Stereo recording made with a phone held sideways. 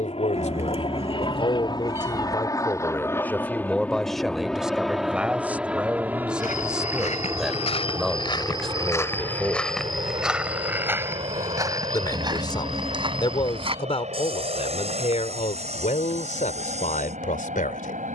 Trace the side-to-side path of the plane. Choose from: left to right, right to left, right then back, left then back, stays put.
left to right.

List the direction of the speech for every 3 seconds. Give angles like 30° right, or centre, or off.
40° left, centre, centre, 10° left, 40° left, 60° left.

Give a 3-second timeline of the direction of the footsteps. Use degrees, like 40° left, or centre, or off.
off, off, 40° left, 10° right, 40° right, 50° right.